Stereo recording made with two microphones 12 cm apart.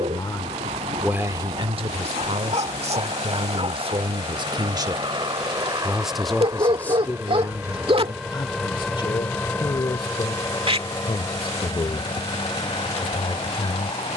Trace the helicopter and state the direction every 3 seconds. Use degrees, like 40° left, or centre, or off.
60° right, 50° right, 10° right, 20° left, 40° left.